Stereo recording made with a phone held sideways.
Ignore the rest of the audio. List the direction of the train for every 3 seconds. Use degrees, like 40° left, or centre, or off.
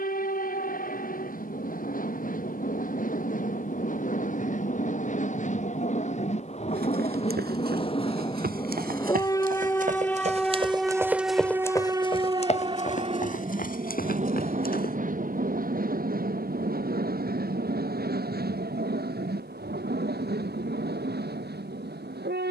60° left, 50° left, 40° left, centre, 40° right, 60° right, 70° right, 80° right.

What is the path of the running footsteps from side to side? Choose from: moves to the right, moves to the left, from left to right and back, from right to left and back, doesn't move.
moves to the left.